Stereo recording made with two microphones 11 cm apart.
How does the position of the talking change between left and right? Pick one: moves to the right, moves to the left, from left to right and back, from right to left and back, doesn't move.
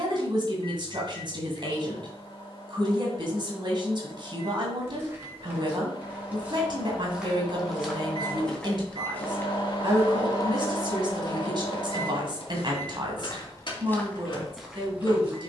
doesn't move.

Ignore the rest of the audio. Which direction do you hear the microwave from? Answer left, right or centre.
left.